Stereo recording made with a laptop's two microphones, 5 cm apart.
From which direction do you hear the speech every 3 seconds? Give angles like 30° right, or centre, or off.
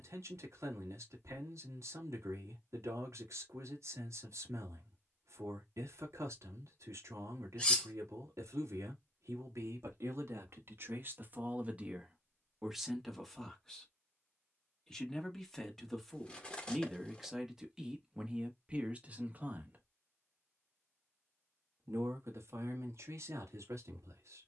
80° right, 80° right, 80° right, 50° right, centre, centre, 30° right, 70° right.